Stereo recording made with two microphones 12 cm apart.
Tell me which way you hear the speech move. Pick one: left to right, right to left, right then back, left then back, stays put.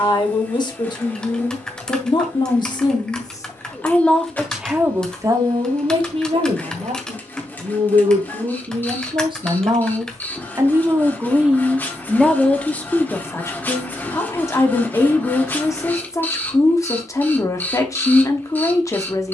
right then back.